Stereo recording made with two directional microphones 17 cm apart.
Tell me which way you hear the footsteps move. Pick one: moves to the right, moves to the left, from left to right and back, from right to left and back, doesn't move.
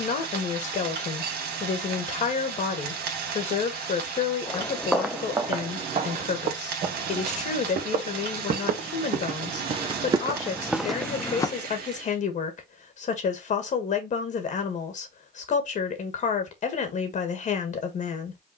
from left to right and back.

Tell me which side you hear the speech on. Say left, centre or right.
left.